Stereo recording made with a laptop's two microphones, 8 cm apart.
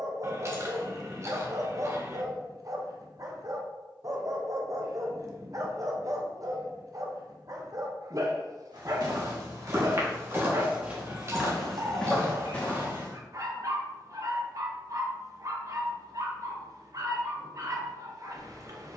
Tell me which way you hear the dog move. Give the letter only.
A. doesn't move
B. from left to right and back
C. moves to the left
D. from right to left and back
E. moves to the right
A.